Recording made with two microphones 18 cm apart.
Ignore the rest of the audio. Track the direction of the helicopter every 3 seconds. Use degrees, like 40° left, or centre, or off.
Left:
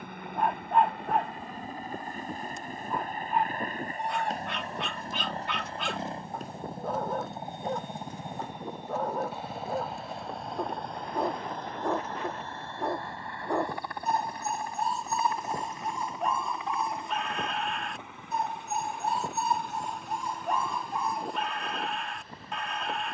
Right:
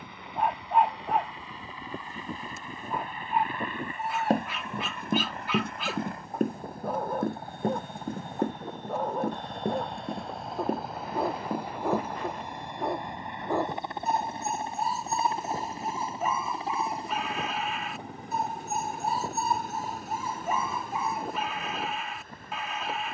60° left, 40° left, 20° left, centre, 20° right, 30° right, 40° right, 50° right.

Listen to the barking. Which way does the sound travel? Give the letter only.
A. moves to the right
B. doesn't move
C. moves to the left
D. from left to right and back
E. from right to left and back
B.